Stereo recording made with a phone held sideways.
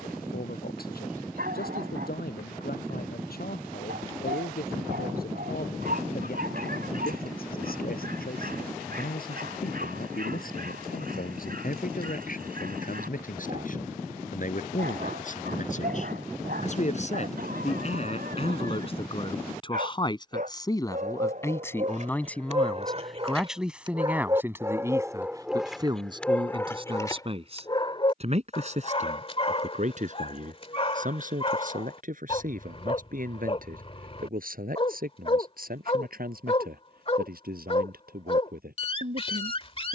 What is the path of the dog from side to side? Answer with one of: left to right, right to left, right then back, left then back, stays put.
right to left.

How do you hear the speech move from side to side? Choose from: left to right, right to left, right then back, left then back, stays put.
left to right.